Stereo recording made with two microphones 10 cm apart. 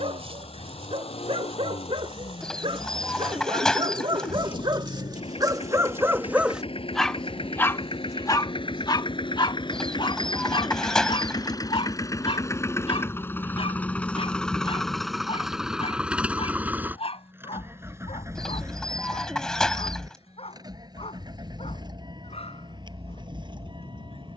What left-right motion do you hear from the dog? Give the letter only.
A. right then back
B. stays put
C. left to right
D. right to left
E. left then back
D.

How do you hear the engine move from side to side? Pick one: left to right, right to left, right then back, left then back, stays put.
left to right.